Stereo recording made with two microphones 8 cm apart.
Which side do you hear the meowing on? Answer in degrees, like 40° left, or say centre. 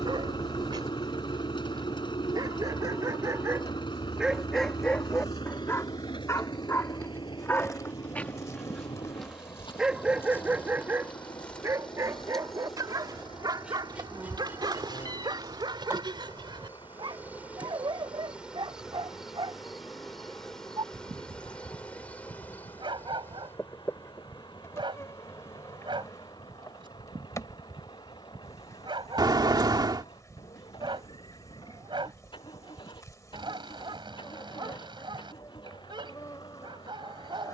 60° right.